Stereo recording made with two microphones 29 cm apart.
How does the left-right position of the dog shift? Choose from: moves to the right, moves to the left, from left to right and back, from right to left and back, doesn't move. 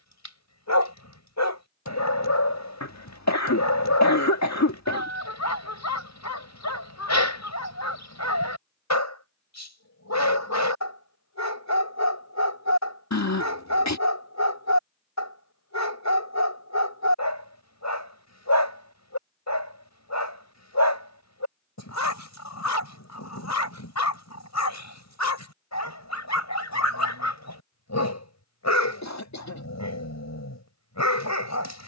doesn't move.